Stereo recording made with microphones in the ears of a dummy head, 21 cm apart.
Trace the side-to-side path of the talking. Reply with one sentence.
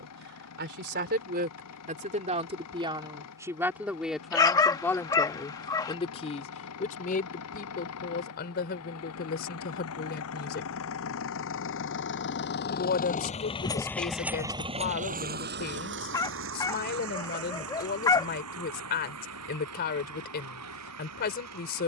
You can hear the talking move to the left.